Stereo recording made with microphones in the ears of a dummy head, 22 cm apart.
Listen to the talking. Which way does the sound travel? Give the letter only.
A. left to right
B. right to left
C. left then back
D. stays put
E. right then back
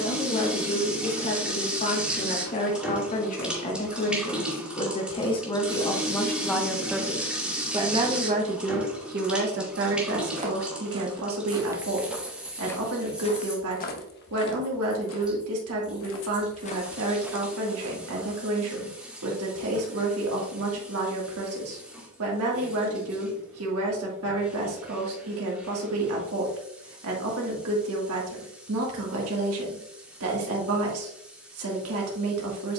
A.